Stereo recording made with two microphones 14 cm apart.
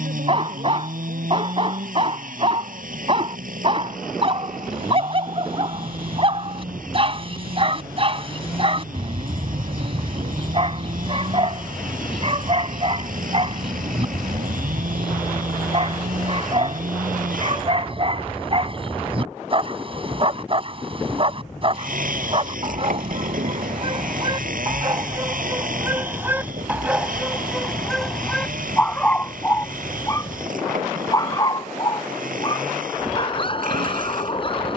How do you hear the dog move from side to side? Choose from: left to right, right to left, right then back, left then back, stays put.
right to left.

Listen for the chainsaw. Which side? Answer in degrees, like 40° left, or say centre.
70° right.